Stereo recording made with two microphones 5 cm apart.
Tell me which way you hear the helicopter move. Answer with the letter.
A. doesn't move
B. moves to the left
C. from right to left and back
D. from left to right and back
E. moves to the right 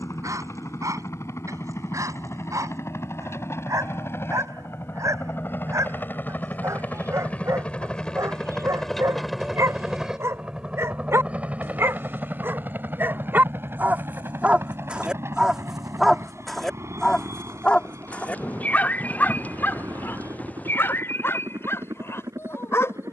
E.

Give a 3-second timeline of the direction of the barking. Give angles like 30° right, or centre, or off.
80° right, 80° right, 70° right, 60° right, 40° right, centre, 40° left, 50° left.